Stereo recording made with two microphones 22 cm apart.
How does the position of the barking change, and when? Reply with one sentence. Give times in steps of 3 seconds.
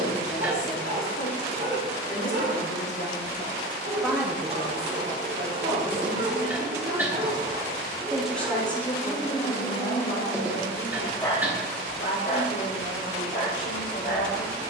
In this clip you hear the barking on the right from 0 s, in the centre from 9 s and on the left from 12 s.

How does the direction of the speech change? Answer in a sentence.
You can hear the speech go right and come back.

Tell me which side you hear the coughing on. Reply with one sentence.
You can hear the coughing in the centre.